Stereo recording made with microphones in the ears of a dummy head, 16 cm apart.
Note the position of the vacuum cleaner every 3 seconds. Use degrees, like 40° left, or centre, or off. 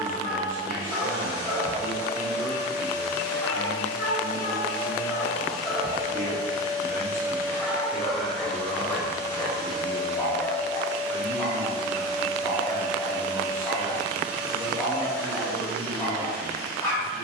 60° left, 30° left, 10° right, 40° left, 60° left, 60° left.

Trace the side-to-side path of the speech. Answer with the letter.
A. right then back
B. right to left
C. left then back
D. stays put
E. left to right
D.